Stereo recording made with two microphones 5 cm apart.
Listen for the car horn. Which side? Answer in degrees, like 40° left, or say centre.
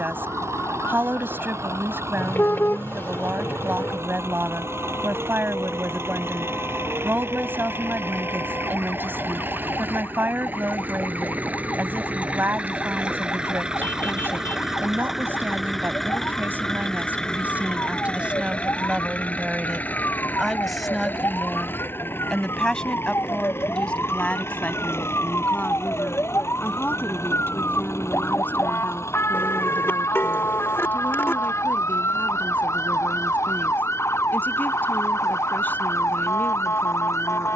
50° left.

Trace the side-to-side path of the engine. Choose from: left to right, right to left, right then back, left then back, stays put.
right to left.